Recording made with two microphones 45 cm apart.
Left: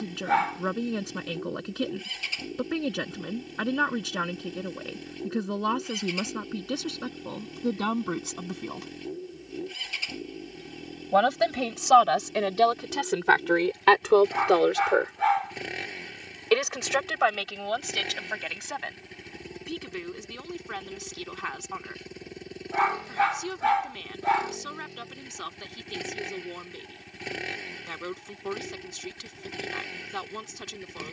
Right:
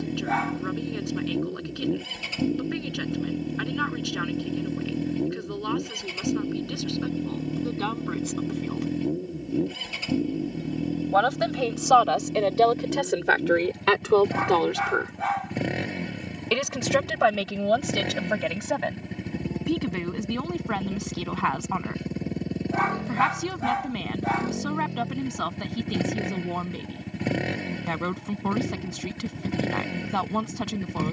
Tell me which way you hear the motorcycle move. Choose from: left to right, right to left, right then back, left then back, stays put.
stays put.